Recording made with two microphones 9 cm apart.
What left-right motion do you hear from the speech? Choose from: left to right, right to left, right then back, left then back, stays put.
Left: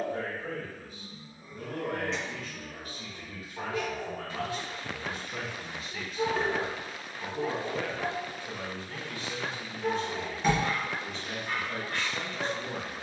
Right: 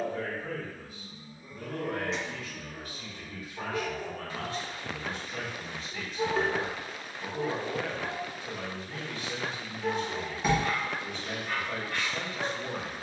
left to right.